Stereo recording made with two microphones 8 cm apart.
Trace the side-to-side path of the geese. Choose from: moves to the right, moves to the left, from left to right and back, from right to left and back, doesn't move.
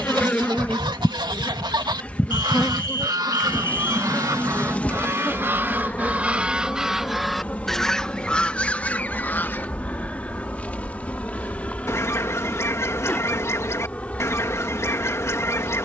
moves to the left.